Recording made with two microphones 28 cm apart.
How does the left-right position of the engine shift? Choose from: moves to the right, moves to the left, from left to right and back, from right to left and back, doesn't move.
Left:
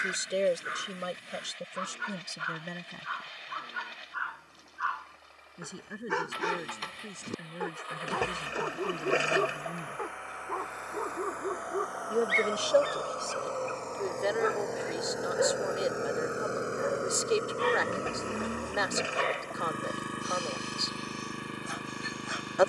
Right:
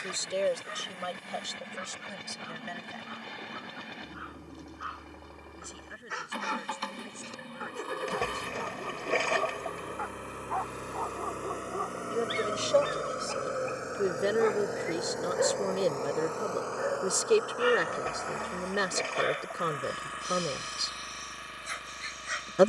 moves to the left.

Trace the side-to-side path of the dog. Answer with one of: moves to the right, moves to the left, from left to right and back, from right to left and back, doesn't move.
moves to the right.